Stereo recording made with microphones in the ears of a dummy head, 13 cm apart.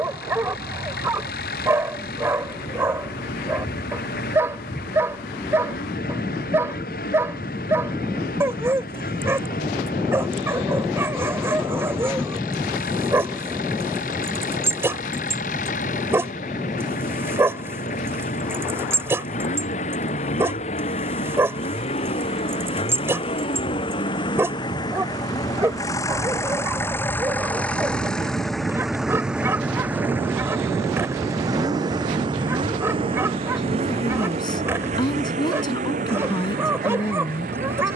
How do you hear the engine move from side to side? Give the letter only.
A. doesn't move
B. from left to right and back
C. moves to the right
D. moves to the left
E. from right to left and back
C.